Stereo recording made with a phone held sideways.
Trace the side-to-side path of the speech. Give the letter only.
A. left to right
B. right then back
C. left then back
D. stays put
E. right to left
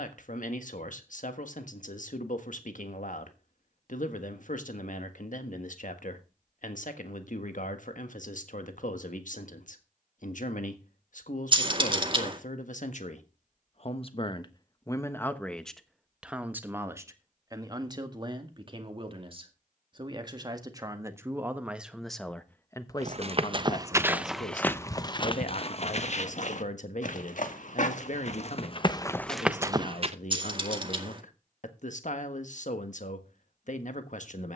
B.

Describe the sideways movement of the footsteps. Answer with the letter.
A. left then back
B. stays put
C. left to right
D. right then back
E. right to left
A.